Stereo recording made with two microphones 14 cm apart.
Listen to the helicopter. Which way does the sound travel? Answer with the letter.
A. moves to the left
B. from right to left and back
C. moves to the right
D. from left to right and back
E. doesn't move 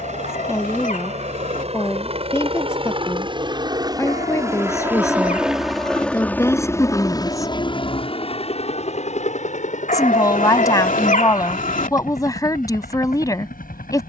A.